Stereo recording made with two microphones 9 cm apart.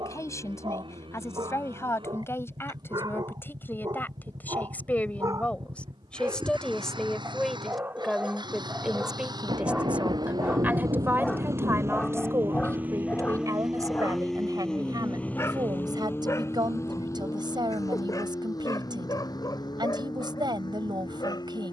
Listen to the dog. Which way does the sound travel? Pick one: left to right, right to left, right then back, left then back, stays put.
right to left.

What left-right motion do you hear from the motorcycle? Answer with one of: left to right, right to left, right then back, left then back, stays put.
right to left.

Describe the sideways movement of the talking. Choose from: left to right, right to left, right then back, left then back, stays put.
left to right.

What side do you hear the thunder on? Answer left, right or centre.
right.